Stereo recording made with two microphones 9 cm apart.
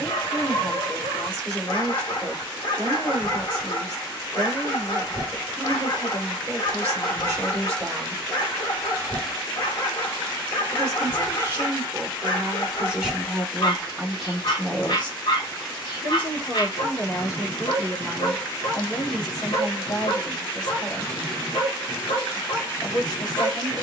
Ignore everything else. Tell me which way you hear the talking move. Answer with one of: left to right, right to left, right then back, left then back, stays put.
right to left.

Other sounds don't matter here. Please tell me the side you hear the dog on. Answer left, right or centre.
left.